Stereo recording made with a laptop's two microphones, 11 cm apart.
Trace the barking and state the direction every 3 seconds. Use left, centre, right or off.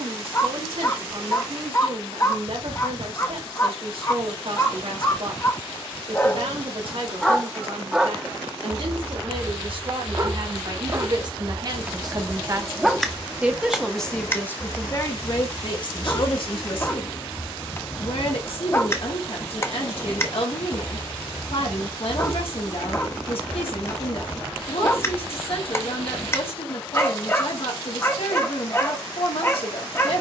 left, left, centre, right, centre, left, left, left, left, left.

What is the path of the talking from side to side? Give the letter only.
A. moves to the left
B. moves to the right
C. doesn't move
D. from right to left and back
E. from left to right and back
A.